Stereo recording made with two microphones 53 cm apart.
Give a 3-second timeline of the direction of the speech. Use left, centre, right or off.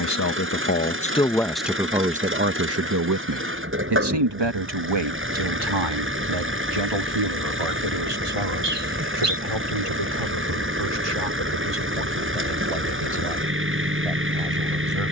centre, right, right, right, right.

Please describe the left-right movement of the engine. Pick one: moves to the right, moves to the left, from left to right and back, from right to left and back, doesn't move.
doesn't move.